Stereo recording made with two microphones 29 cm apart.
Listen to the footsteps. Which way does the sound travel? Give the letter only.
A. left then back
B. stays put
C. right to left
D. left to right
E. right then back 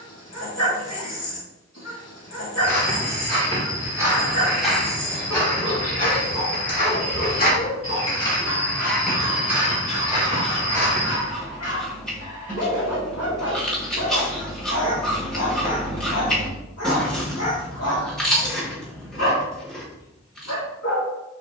A.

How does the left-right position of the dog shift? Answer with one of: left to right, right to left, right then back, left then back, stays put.
stays put.